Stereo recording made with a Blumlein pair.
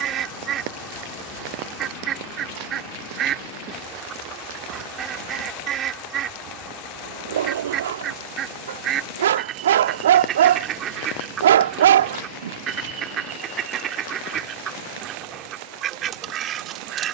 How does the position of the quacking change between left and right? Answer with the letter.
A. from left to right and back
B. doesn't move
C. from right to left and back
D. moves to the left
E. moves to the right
B.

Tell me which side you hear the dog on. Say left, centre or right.
right.